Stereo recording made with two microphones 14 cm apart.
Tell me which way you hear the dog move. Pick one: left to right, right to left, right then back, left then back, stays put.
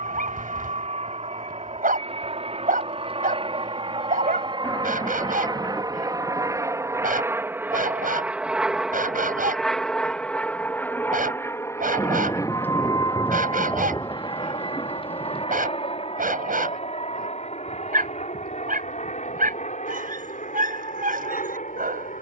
stays put.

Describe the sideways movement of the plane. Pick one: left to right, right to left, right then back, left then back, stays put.
right to left.